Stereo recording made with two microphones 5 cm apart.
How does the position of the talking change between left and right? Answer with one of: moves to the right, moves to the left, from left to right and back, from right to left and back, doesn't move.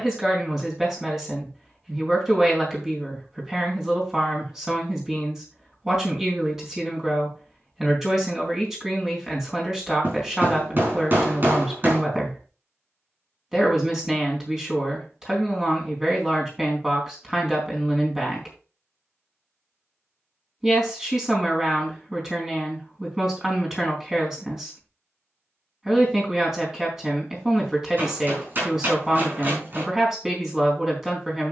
doesn't move.